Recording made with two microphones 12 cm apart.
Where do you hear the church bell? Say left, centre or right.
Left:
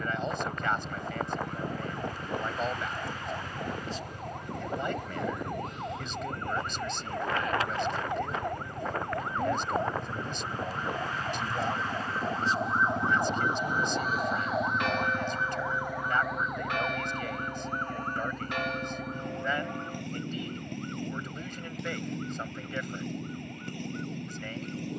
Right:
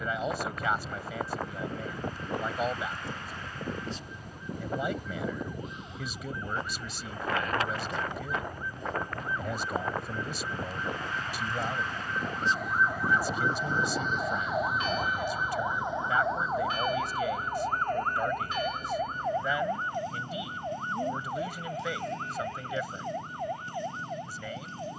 left.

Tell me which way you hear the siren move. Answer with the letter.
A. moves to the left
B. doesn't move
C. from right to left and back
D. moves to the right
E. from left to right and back
D.